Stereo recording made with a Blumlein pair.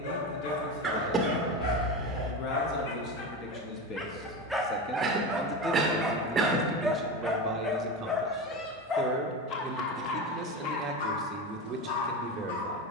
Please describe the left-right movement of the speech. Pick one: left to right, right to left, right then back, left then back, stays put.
left to right.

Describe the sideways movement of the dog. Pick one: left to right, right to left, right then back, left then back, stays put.
right then back.